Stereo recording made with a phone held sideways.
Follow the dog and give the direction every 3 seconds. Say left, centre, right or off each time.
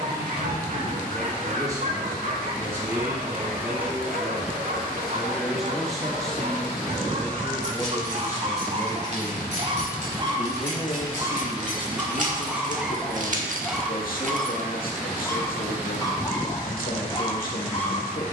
right, right, right, right, centre, left.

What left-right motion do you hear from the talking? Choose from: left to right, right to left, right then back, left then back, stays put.
right to left.